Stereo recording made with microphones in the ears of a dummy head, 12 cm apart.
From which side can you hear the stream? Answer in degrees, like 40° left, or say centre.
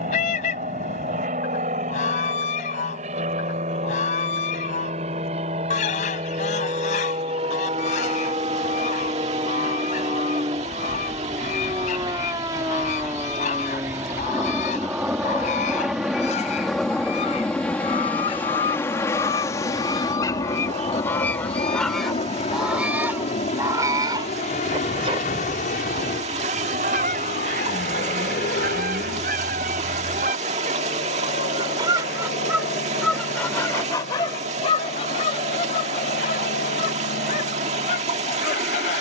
50° right.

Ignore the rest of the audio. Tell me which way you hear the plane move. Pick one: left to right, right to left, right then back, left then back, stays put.
right to left.